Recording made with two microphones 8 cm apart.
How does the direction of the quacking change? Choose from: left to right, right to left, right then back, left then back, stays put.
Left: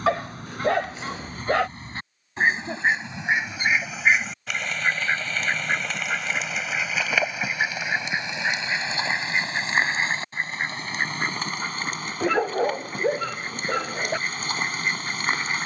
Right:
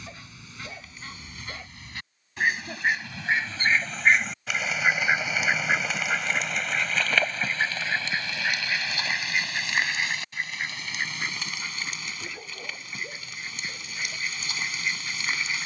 right then back.